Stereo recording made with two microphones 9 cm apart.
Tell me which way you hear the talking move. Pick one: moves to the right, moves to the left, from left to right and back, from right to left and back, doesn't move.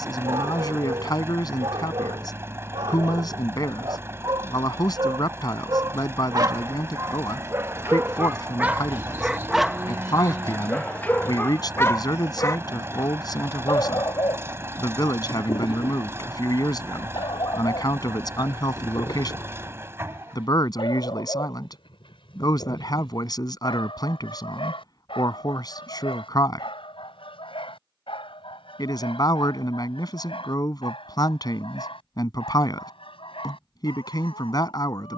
doesn't move.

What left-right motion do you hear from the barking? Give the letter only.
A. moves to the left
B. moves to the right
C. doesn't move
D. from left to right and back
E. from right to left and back
A.